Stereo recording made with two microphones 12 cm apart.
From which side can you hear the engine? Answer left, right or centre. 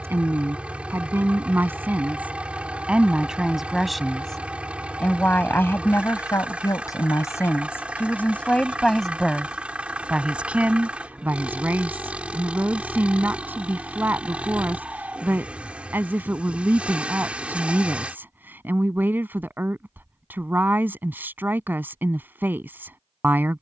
centre.